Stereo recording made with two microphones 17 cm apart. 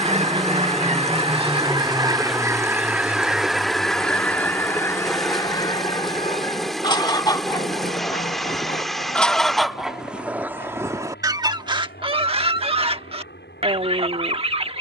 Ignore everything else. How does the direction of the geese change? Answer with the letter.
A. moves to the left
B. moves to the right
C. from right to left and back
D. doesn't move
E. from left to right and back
C.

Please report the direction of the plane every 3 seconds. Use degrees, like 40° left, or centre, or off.
10° right, 30° left, 50° left, 60° left, 70° left.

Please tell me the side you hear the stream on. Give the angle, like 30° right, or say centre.
centre.